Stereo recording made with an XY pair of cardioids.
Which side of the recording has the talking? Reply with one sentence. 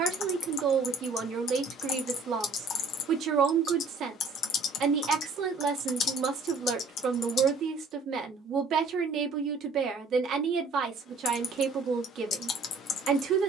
You can hear the talking on the right.